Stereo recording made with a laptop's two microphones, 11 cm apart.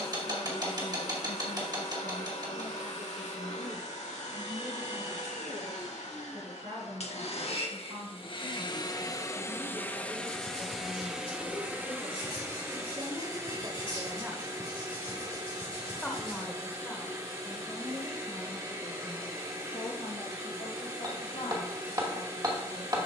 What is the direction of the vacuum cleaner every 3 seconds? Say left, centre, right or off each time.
left, left, left, centre, right, right, right, right.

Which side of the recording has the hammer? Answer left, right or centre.
right.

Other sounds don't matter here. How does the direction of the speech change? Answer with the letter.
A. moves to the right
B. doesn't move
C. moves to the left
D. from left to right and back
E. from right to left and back
C.